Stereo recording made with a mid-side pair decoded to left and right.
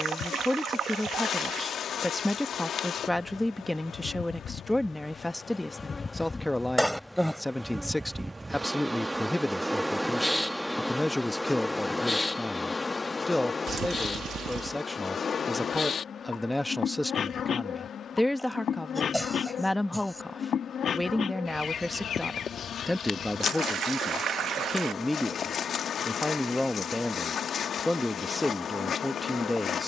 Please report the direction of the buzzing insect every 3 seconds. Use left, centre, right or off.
left, left, centre, centre, left, left, left, left, left, left.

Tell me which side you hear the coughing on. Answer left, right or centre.
centre.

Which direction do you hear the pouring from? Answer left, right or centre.
right.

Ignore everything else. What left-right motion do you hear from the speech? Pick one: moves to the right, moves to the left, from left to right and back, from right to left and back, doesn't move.
doesn't move.